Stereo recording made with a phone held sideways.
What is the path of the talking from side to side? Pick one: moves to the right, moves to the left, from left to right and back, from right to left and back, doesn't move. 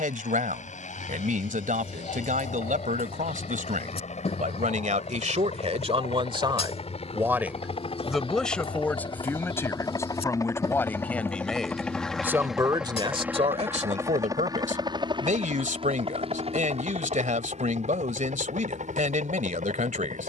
from right to left and back.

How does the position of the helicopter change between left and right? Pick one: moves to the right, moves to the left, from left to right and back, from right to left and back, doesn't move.
moves to the right.